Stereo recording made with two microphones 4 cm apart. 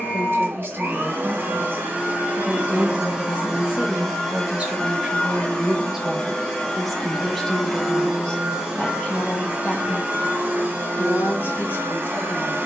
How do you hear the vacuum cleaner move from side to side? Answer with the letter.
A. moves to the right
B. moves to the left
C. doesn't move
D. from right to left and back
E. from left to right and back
D.